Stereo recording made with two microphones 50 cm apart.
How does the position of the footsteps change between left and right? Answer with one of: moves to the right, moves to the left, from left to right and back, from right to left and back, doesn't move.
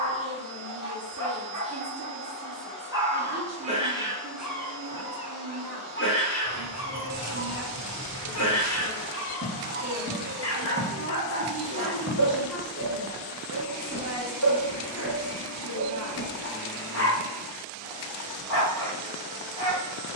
from left to right and back.